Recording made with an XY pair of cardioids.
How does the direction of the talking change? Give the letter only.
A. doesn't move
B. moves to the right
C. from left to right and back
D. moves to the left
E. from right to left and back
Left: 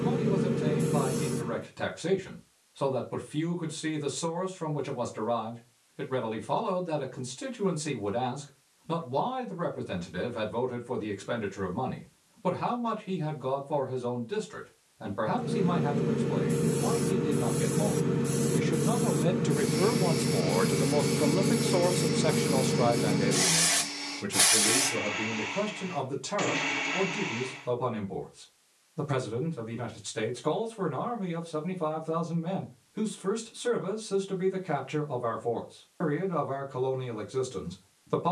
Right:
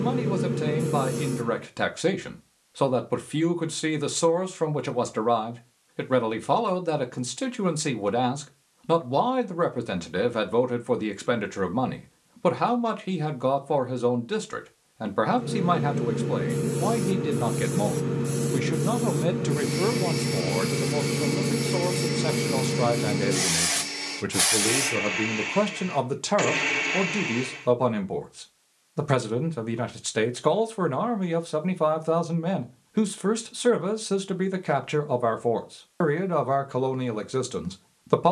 E.